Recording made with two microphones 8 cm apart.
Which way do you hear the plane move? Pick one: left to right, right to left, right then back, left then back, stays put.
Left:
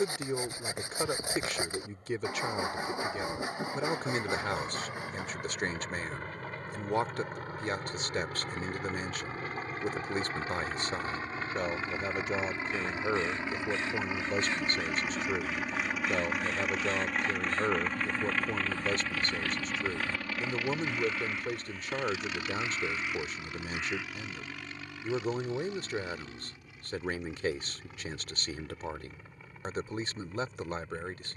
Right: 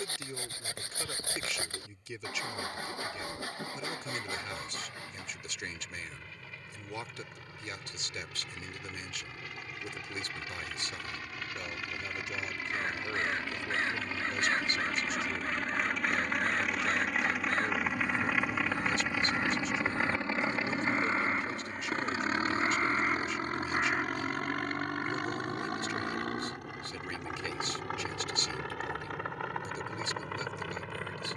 left to right.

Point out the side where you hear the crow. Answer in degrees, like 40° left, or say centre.
40° right.